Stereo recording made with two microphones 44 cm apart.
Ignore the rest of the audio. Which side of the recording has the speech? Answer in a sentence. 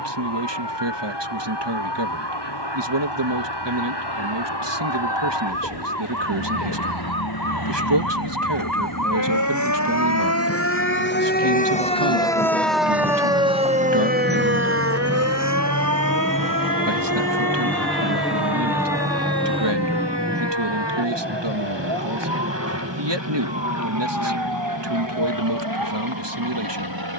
In this clip you hear the speech on the right.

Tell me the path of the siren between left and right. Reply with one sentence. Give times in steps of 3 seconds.
You can hear the siren on the left from 0 s, in the centre from 12 s and on the right from 15 s.